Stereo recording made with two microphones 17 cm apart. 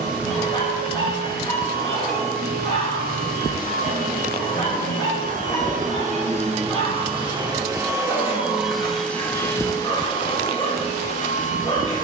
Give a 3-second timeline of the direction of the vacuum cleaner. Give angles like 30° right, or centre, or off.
70° right, 50° right, 20° right, 30° left.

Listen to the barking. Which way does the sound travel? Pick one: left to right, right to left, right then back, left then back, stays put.
stays put.